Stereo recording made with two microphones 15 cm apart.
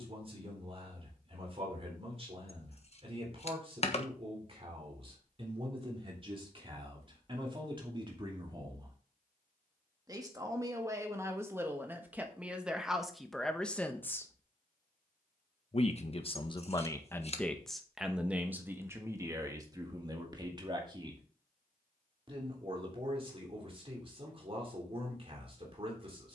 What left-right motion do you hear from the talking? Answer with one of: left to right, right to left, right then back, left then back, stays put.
left then back.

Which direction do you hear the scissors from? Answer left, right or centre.
left.